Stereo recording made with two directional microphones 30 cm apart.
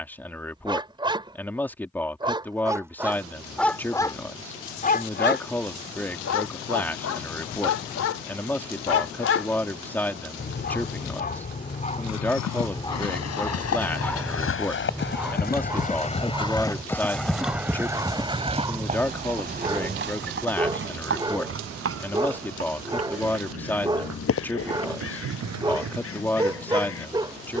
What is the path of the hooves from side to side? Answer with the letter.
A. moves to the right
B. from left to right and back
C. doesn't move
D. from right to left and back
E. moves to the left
A.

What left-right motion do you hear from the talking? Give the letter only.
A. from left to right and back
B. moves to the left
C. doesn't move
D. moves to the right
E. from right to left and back
C.